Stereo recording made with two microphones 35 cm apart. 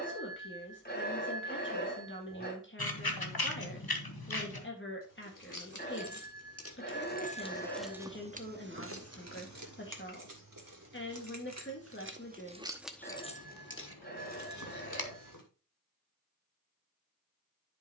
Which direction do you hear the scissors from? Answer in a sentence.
You can hear the scissors on the left.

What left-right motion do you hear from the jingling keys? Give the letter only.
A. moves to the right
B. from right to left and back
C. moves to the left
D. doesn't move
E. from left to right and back
E.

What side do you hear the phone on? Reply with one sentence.
In this clip you hear the phone on the left.